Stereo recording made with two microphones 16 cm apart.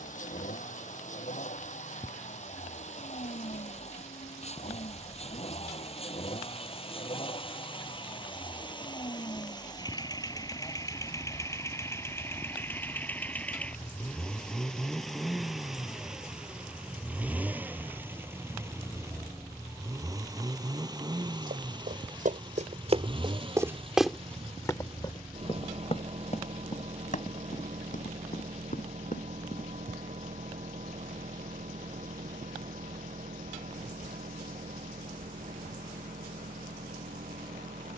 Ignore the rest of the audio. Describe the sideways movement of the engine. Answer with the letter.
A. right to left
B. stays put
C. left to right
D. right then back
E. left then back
C.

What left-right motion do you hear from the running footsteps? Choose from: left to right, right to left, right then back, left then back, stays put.
right to left.